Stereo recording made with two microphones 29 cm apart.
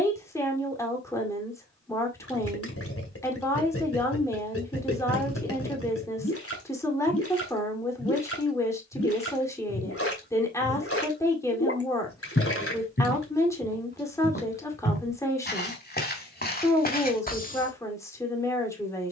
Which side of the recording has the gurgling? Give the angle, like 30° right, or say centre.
50° left.